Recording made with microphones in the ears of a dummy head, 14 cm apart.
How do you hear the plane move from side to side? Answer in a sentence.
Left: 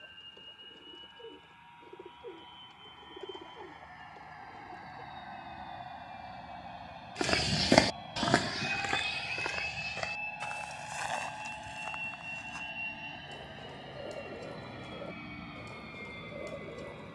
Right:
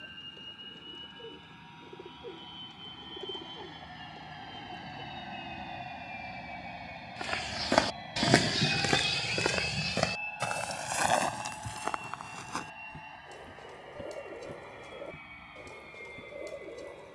In this clip you hear the plane move to the left.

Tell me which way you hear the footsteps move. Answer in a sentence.
In this clip you hear the footsteps travel towards the right.